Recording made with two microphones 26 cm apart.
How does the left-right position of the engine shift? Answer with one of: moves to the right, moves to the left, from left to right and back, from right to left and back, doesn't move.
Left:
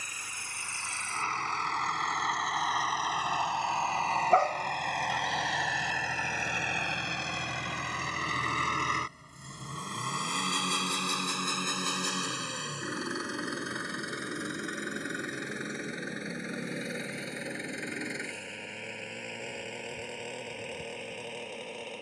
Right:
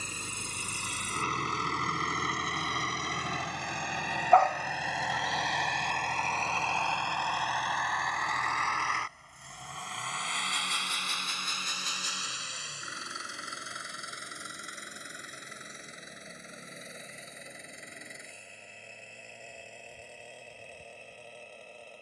moves to the left.